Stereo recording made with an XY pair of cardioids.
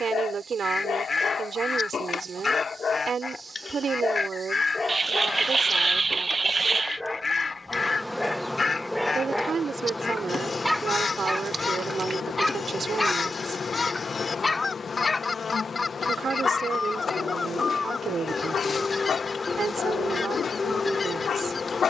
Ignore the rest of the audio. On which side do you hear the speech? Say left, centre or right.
right.